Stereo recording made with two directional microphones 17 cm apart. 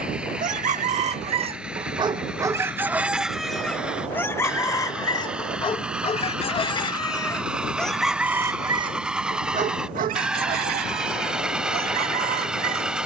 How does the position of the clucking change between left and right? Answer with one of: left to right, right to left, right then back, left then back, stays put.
left then back.